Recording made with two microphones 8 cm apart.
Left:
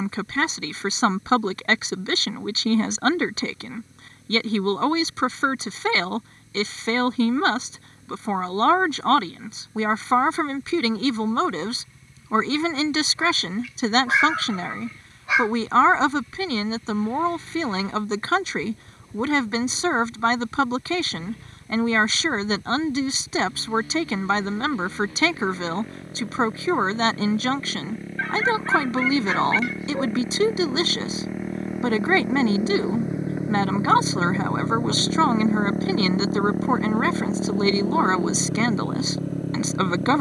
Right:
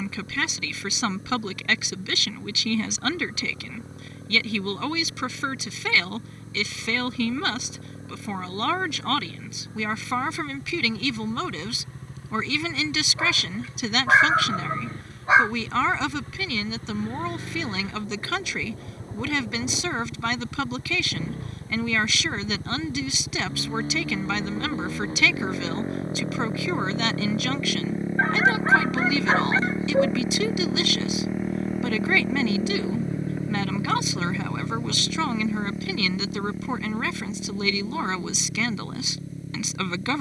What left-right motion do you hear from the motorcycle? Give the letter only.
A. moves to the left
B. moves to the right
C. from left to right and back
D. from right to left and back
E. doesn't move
A.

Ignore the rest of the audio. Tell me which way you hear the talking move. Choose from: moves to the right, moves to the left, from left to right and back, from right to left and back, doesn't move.
doesn't move.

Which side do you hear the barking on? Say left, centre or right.
right.